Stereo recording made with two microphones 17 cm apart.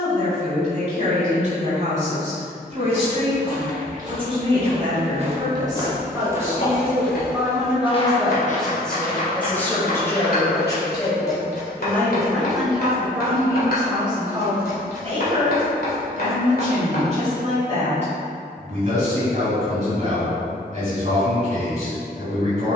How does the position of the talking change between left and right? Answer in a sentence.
You can hear the talking move from right to left and back again.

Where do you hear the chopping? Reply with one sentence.
In this clip you hear the chopping on the left.